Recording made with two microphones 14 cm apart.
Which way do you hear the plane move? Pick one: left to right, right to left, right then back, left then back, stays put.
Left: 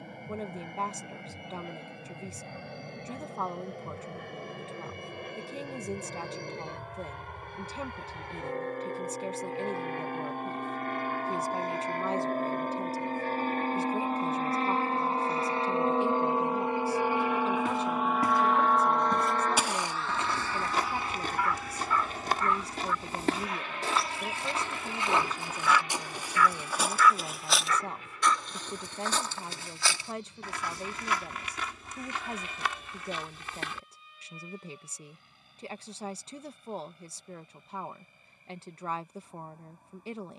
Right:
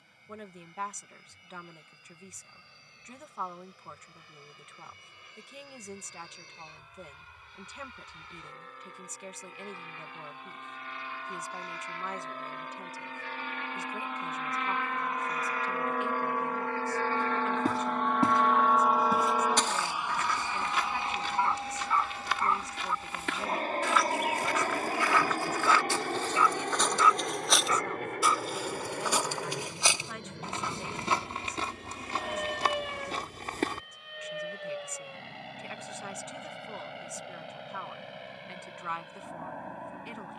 left to right.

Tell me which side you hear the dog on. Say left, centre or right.
right.